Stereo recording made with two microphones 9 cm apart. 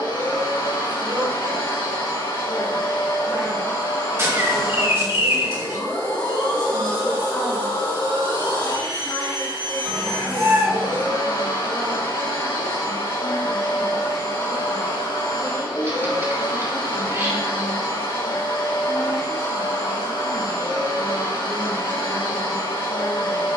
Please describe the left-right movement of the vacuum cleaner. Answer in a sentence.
In this clip you hear the vacuum cleaner stay in one place.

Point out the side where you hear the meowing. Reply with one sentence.
You can hear the meowing on the right.